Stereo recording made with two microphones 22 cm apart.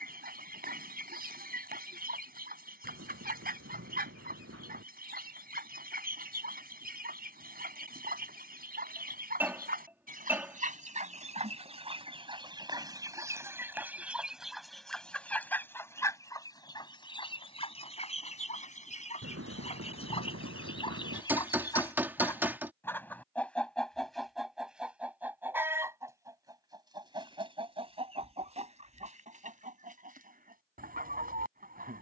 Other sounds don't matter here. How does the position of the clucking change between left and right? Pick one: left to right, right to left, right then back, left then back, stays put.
left then back.